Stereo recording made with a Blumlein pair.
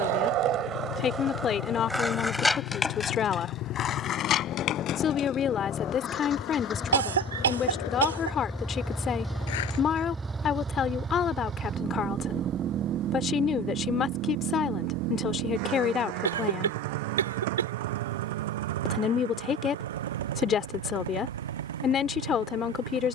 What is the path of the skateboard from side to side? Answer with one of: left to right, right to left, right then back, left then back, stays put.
right to left.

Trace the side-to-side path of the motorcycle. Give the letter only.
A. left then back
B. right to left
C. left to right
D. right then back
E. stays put
C.